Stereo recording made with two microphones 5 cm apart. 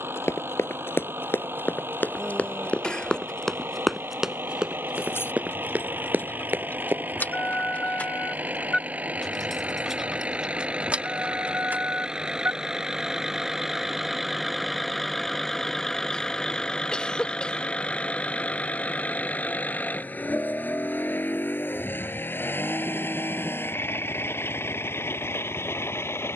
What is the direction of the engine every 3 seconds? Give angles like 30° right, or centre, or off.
50° right, 50° right, 40° right, 30° right, 10° right, 10° left, 30° left, 50° left, 60° left.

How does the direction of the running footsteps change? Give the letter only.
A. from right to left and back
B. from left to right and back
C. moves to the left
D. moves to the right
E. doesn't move
D.